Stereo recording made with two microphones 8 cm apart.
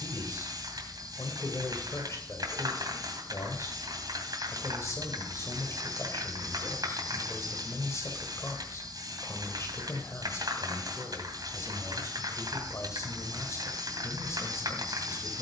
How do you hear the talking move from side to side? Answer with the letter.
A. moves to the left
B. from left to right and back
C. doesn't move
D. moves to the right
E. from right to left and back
C.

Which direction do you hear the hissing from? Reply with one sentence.
In this clip you hear the hissing on the right.